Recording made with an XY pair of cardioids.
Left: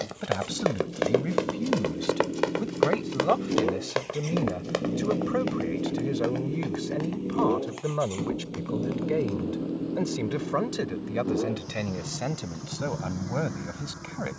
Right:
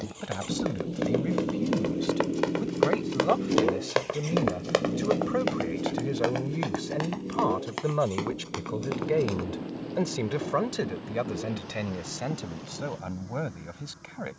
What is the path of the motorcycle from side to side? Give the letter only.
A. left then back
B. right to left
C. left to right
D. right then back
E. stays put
B.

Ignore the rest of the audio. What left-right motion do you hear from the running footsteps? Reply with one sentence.
You can hear the running footsteps move from left to right.